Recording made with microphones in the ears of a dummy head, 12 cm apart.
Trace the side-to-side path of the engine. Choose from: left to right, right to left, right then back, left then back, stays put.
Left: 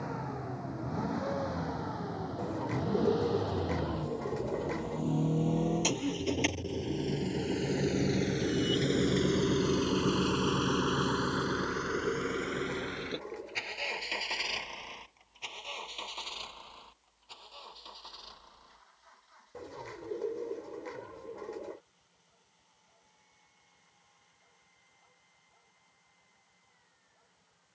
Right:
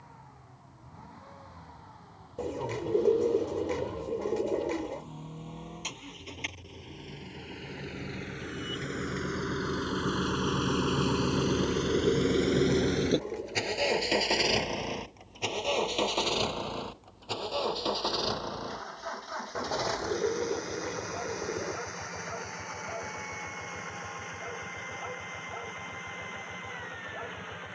left to right.